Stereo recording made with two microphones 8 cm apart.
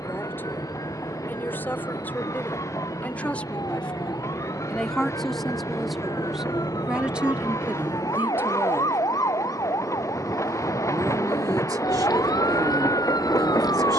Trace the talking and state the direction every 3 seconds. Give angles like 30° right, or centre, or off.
20° left, 10° left, 20° right, 50° right, 60° right.